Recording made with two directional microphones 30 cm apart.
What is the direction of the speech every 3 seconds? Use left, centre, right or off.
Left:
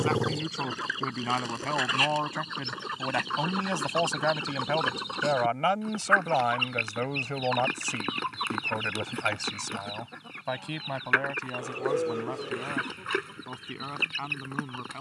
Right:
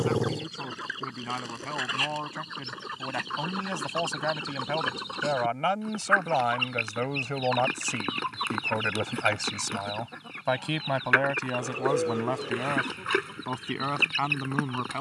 left, left, centre, right, right.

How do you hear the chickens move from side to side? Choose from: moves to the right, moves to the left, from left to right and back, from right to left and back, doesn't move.
moves to the right.